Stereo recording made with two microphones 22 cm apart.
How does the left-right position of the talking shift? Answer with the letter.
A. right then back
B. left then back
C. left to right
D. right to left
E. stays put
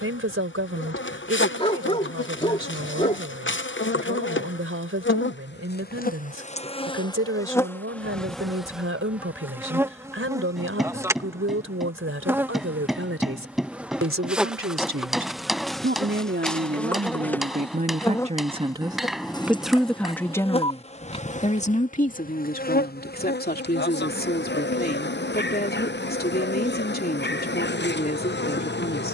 D.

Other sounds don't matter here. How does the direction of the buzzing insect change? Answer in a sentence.
You can hear the buzzing insect go right and come back.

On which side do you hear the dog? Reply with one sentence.
In this clip you hear the dog on the left.